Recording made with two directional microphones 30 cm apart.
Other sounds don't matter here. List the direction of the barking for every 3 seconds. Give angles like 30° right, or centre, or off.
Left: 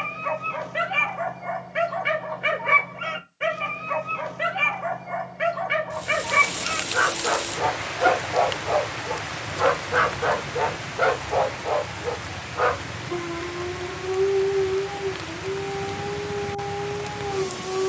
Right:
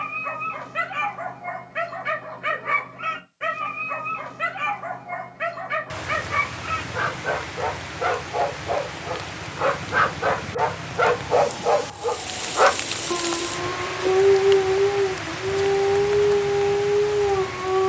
30° left, 30° left, 20° left, 10° right, 50° right, 60° right.